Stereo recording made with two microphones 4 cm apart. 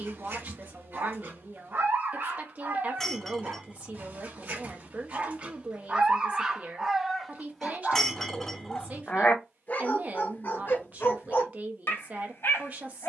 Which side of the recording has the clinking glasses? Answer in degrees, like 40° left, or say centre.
10° left.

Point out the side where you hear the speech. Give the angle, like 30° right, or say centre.
40° right.